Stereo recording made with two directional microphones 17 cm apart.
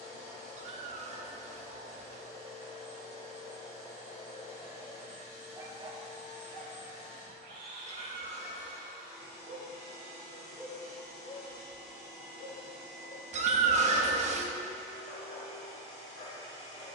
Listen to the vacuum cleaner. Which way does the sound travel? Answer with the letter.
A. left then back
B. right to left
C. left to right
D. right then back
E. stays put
E.